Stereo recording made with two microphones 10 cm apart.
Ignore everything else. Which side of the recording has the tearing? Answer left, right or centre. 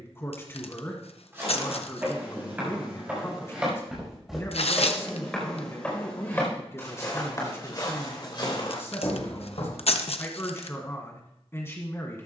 left.